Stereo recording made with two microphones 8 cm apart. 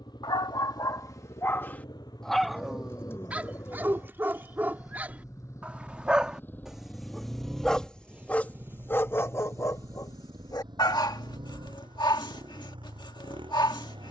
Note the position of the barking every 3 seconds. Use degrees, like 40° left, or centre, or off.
30° left, 20° right, centre, 50° left, 70° left.